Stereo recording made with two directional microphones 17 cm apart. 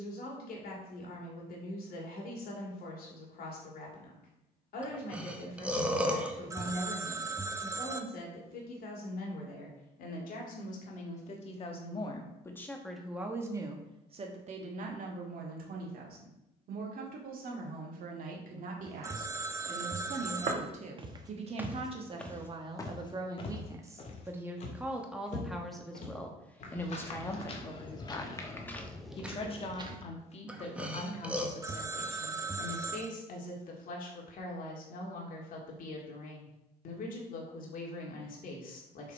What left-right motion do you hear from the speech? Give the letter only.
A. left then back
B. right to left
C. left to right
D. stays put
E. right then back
E.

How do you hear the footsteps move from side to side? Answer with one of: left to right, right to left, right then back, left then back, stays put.
left then back.